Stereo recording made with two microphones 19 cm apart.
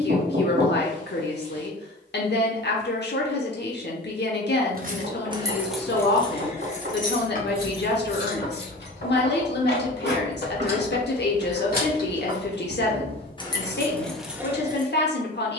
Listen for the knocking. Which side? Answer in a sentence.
You can hear the knocking on the right.